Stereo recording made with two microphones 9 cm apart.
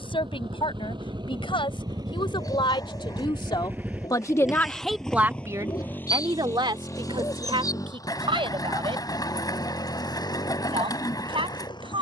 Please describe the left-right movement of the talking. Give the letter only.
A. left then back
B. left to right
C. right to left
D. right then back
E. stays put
B.